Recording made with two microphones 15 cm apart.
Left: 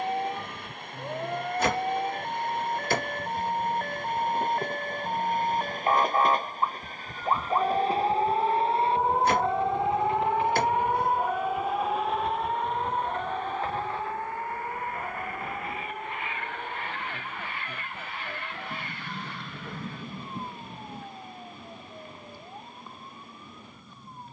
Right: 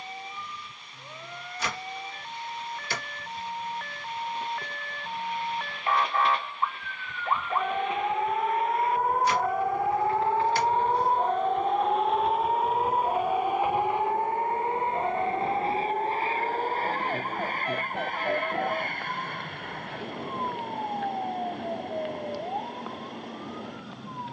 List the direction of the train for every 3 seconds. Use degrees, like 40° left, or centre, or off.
60° left, 50° left, 40° left, 10° left, 10° right, 30° right, 50° right, 60° right.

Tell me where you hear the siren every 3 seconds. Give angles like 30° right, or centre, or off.
50° left, 40° left, 20° left, 10° right, 40° right, 50° right, 70° right, 70° right.